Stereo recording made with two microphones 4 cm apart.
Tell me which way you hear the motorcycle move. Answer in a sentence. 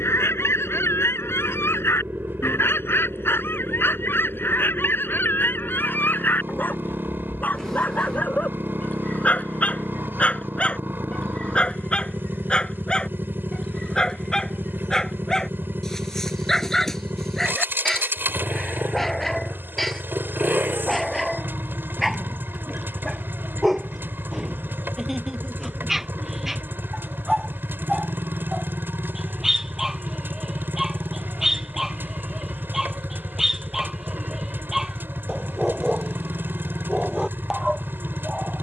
In this clip you hear the motorcycle stay put.